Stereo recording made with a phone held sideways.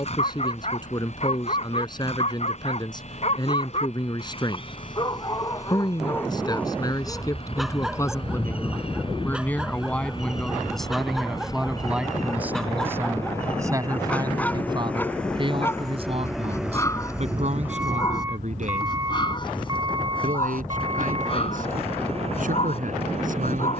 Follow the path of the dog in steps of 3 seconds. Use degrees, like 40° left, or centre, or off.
50° left, 30° left, centre, centre, 10° left, 20° left, 30° left, 40° left.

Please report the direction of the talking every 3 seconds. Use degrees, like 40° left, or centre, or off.
30° left, 30° left, 20° left, centre, 20° right, 40° right, 60° right, 60° right.